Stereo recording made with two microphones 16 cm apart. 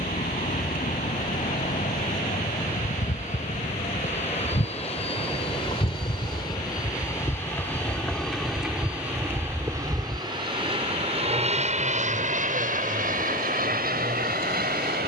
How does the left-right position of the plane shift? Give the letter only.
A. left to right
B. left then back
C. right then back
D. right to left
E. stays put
A.